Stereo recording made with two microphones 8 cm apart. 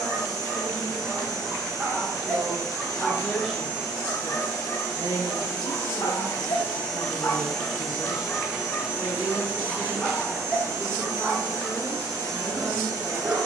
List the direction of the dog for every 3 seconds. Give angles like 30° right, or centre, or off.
20° right, 40° left, 40° left, 10° right, 20° right.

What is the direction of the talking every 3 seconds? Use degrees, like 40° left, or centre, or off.
20° left, 30° right, 50° right, 10° left, 30° left.